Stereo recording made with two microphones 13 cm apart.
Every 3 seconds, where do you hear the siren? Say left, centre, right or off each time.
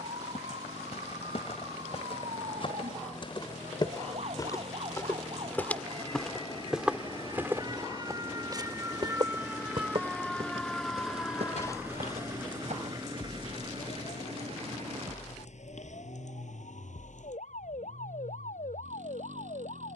right, right, right, centre, left, left, left.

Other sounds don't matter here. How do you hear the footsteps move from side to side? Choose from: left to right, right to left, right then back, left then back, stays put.
left to right.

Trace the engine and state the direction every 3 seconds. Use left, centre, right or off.
left, left, left, centre, right, right, right.